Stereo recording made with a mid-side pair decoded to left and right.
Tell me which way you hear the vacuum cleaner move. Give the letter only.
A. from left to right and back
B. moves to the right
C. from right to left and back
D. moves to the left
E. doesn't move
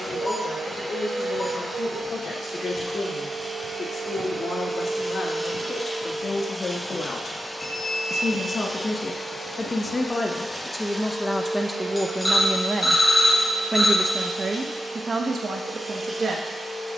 C.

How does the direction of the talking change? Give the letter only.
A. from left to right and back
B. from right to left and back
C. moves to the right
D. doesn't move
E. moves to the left
C.